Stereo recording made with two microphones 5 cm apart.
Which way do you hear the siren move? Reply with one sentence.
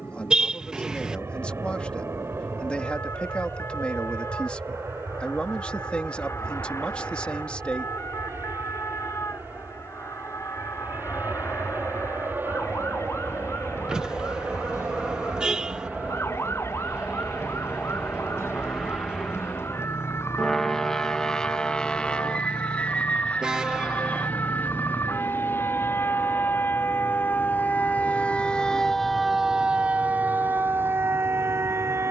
You can hear the siren go from the left side to the right.